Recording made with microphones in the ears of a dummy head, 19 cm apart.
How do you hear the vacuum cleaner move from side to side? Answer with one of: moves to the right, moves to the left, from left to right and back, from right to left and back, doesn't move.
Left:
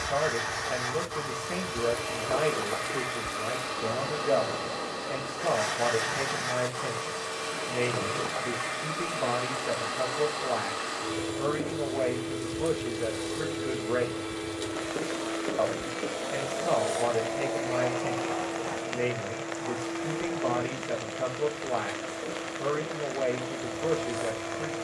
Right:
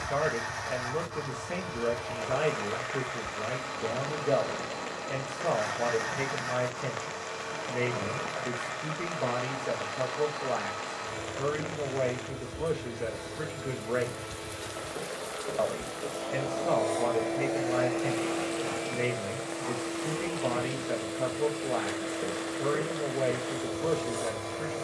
moves to the right.